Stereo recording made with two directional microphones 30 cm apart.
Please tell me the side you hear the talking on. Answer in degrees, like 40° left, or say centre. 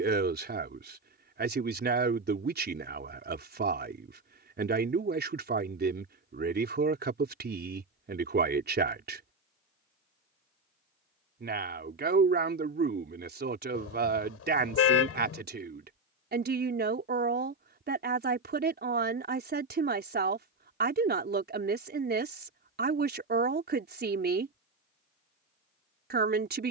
30° right.